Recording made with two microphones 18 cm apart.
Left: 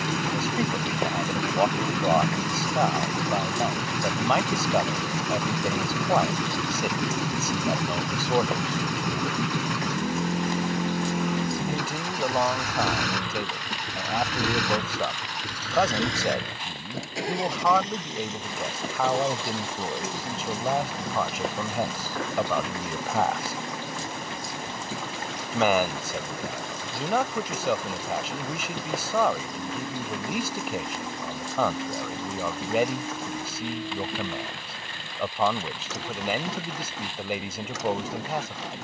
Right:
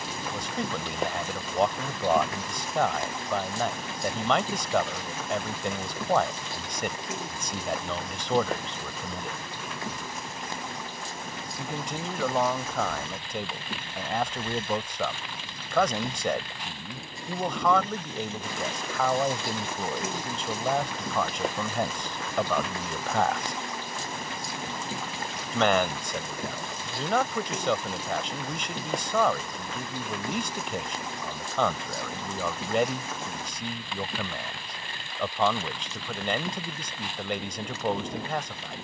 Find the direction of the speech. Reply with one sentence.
You can hear the speech in the centre.